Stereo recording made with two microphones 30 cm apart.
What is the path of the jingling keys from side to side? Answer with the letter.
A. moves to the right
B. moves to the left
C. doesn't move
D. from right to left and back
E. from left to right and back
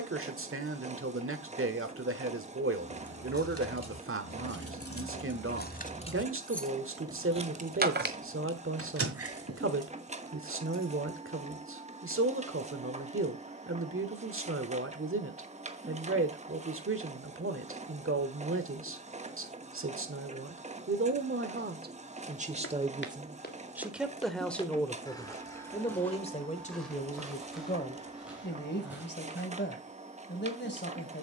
A.